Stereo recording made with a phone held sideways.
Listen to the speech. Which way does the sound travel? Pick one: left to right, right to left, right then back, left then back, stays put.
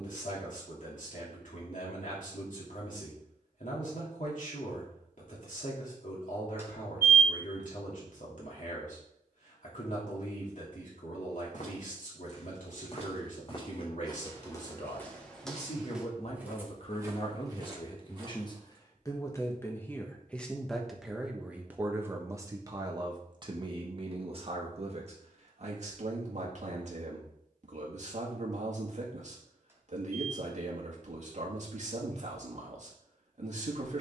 left to right.